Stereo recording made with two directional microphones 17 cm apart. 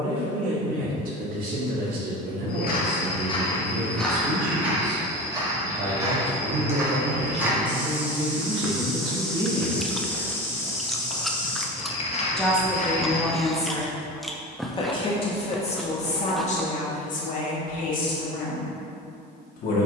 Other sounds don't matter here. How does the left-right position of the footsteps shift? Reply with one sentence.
In this clip you hear the footsteps move from left to right and back again.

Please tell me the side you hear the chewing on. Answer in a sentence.
In this clip you hear the chewing in the centre.